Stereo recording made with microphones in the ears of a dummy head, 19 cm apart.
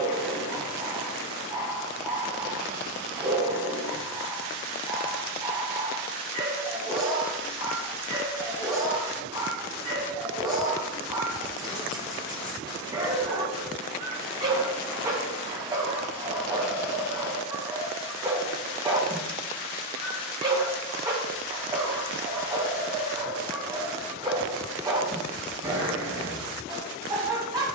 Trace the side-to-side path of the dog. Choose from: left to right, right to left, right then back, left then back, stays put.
stays put.